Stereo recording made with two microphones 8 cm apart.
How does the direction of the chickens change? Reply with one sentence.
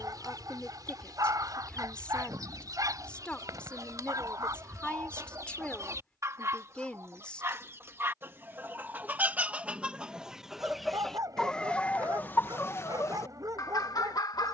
You can hear the chickens travel towards the left.